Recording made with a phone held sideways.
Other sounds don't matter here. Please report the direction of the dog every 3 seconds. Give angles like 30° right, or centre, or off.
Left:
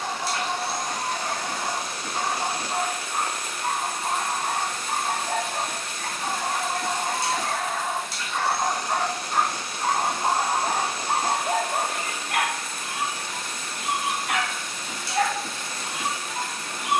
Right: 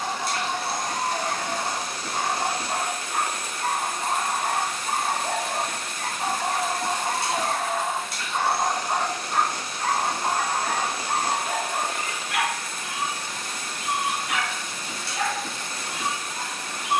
70° right, 60° right, 30° right, 20° left, 50° left, 60° left.